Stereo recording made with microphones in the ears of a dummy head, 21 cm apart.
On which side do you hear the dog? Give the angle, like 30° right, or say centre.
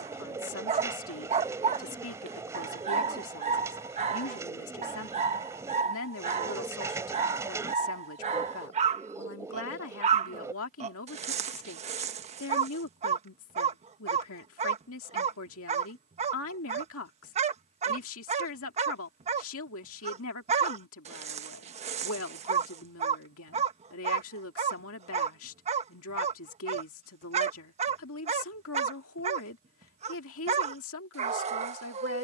30° right.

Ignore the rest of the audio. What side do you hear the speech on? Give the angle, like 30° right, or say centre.
60° left.